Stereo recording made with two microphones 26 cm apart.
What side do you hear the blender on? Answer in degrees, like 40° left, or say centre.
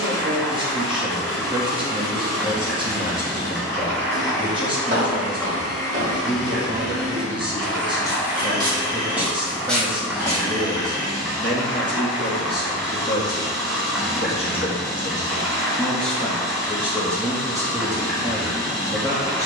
40° right.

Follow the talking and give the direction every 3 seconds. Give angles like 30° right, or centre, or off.
20° right, 20° right, 20° right, centre, 30° left, centre, 10° right.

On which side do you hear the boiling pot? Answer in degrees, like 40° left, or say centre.
centre.